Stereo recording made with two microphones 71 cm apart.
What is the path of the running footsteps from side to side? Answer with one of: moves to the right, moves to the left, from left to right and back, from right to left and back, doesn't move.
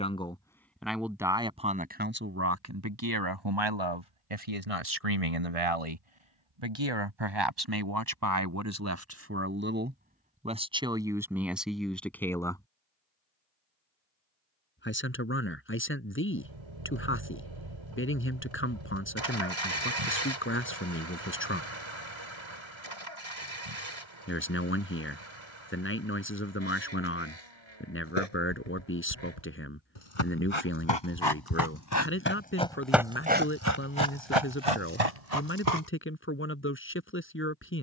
moves to the right.